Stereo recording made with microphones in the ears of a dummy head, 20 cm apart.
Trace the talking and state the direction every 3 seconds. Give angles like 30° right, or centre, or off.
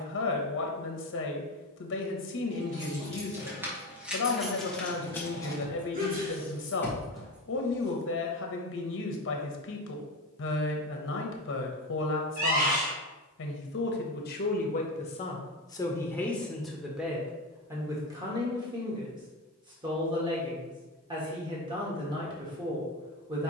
60° left, 60° left, 60° left, 60° left, 50° left, 10° left, 20° right, 20° right.